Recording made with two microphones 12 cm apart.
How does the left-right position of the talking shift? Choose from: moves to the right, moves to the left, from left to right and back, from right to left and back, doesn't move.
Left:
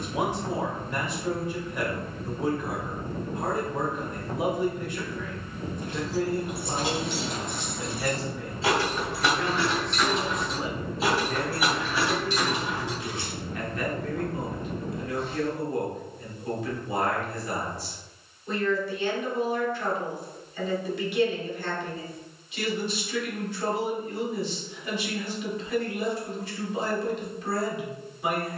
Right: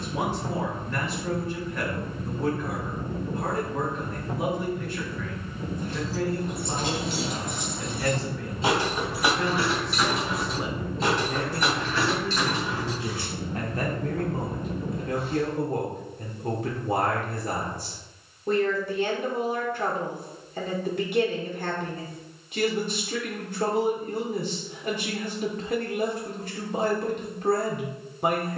moves to the right.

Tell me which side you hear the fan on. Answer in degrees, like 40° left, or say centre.
centre.